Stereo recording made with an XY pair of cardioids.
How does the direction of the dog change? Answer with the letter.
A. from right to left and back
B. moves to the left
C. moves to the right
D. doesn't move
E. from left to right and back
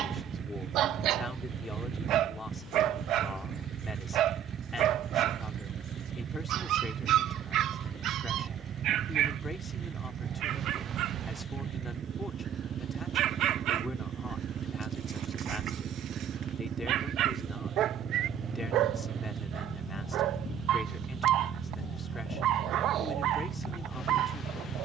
D.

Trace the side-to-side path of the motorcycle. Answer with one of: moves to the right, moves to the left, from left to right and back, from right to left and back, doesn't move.
doesn't move.